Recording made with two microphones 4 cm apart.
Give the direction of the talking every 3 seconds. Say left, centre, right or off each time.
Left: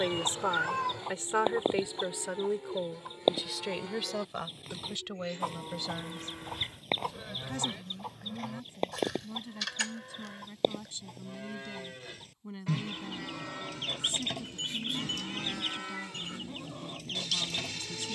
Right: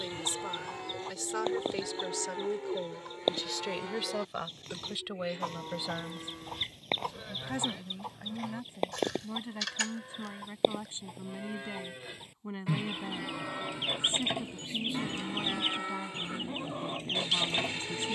left, centre, right, right, right, right.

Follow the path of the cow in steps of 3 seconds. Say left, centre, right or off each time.
right, centre, centre, centre, centre, right.